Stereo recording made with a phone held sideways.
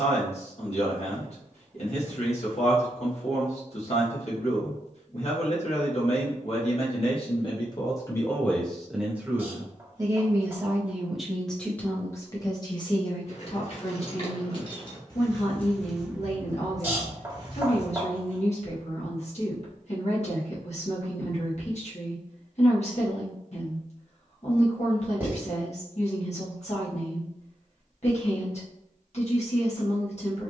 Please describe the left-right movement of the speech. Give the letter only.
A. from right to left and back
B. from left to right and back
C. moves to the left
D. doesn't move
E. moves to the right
B.